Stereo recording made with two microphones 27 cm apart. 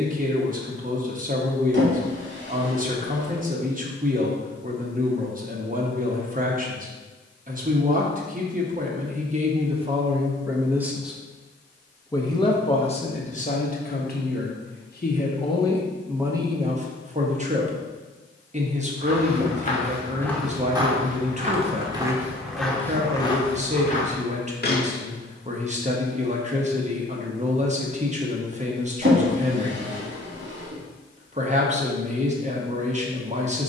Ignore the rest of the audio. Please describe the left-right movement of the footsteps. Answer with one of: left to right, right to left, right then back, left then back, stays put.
right then back.